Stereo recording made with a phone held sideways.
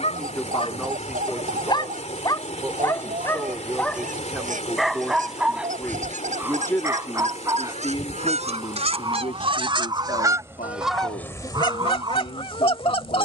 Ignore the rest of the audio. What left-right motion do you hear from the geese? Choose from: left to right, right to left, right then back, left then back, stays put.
right to left.